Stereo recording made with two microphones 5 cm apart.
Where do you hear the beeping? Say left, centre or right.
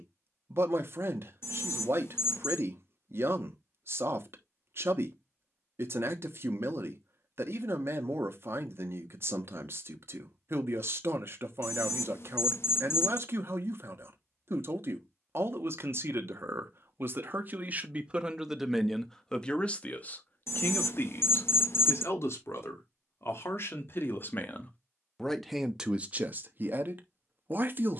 left.